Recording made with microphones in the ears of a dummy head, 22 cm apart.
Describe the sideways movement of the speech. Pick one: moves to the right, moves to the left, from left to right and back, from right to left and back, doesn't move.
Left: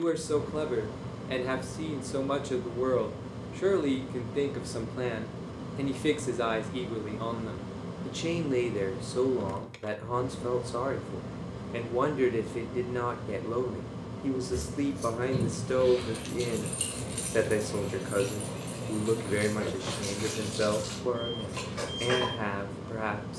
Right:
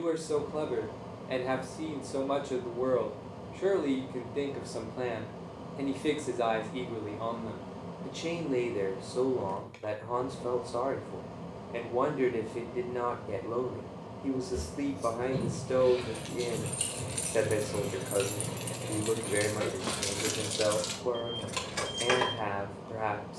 doesn't move.